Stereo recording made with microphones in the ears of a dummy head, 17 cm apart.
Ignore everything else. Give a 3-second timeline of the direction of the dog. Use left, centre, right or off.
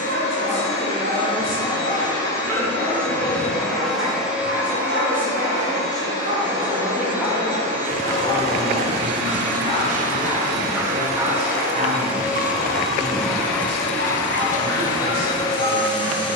right, right, centre, centre, right, right.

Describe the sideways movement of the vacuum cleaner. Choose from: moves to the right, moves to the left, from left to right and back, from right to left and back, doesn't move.
from left to right and back.